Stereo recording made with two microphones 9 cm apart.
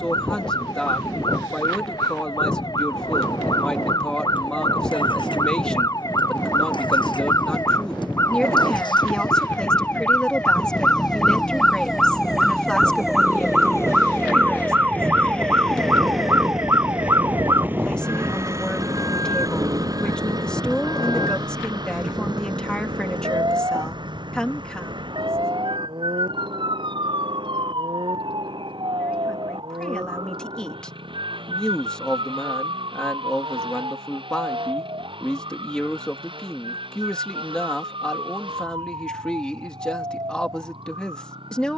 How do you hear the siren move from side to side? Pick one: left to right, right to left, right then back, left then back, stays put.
left to right.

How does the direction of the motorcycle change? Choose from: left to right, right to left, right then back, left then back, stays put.
left to right.